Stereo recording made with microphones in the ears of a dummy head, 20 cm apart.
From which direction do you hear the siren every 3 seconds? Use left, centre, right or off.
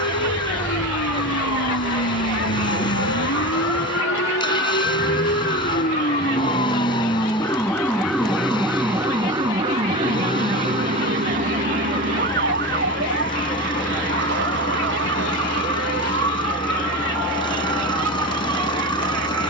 left, left, centre, right, right, right, right.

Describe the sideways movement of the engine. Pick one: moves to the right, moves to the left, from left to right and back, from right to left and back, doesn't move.
doesn't move.